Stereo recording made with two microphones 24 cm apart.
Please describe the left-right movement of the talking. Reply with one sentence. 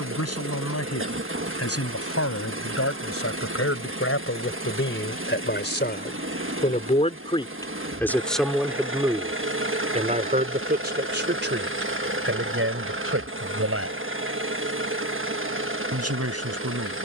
You can hear the talking go from the left side to the right.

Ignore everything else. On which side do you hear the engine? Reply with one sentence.
In this clip you hear the engine on the right.